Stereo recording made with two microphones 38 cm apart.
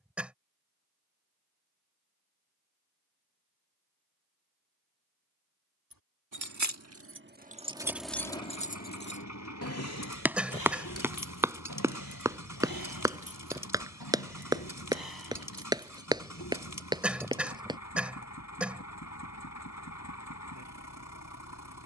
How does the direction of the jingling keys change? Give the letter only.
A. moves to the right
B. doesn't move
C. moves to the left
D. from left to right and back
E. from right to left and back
C.